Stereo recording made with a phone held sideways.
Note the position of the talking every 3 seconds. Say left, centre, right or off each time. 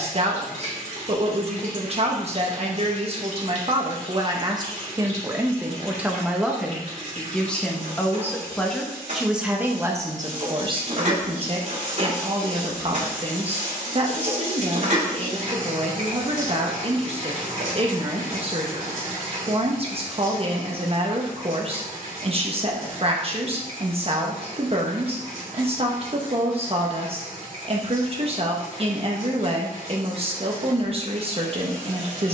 right, right, centre, right, right, right, right, right, right, right, right.